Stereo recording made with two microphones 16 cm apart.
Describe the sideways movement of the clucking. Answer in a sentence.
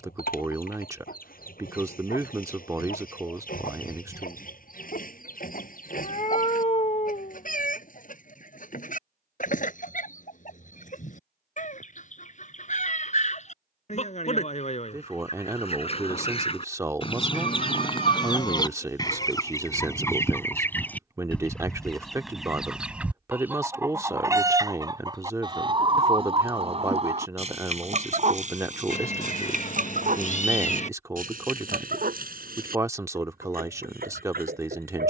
In this clip you hear the clucking move from left to right.